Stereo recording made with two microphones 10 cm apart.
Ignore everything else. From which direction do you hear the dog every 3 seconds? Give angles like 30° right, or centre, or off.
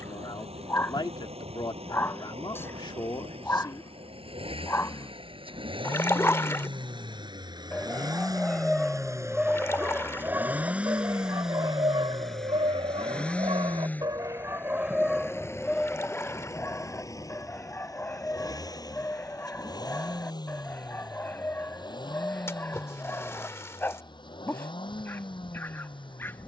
20° left, 20° left, 10° left, 20° right, 50° right, 10° left, 20° left, 20° left, 20° left.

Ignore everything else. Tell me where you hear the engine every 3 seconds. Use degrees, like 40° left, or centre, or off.
80° right, 60° right, 40° right, 10° right, 10° left, 30° left, 40° left, 50° left, 50° left.